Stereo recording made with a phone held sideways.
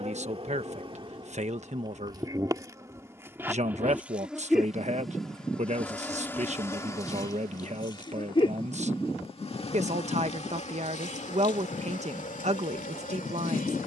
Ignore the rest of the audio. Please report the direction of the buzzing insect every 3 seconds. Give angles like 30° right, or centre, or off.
30° right, centre, 20° left, 40° left, 50° left.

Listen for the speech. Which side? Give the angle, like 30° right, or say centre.
40° right.